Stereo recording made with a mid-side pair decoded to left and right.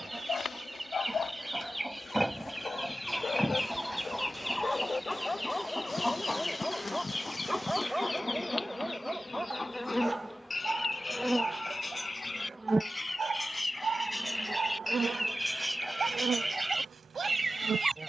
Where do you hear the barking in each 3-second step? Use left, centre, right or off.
left, left, centre, right, right, right.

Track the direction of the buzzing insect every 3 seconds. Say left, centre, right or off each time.
left, left, left, centre, right, right.